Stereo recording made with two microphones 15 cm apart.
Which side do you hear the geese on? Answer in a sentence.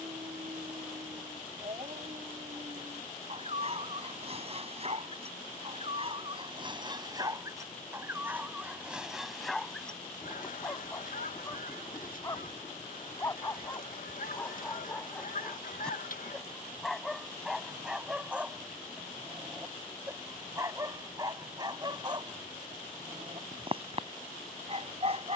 In this clip you hear the geese on the left.